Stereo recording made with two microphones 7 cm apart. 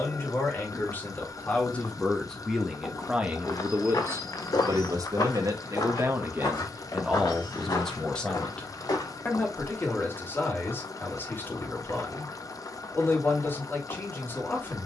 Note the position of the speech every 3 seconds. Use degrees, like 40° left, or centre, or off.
20° left, 40° right, 10° right, 30° left, 30° left.